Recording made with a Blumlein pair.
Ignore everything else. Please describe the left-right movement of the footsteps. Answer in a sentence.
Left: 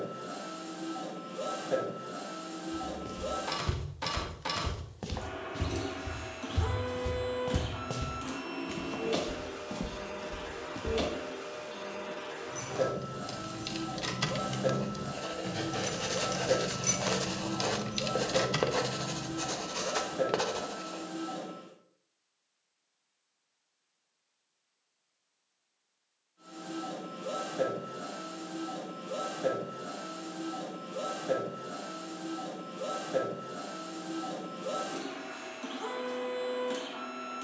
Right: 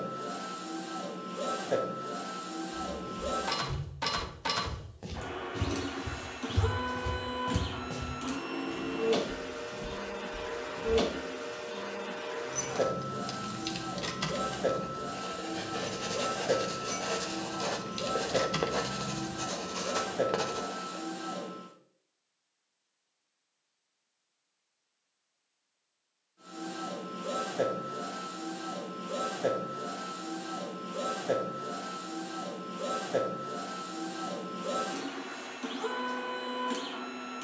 You can hear the footsteps go right and come back.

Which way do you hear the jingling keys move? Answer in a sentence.
In this clip you hear the jingling keys go left and come back.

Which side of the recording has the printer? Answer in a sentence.
In this clip you hear the printer in the centre.